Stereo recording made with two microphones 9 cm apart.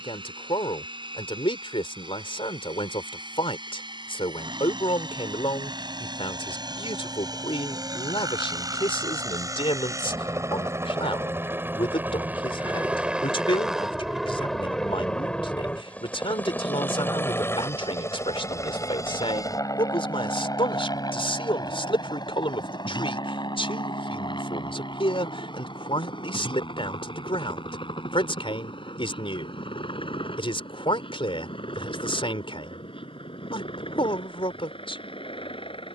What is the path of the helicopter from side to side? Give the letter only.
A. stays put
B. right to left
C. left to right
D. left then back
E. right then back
B.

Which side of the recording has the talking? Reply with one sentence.
You can hear the talking on the left.